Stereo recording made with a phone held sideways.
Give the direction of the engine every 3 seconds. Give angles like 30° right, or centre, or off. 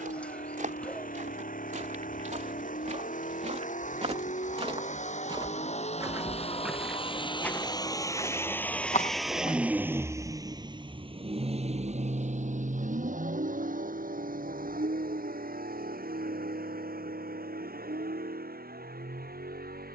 60° left, 50° left, 30° left, 20° right, 60° right, 70° right, 80° right.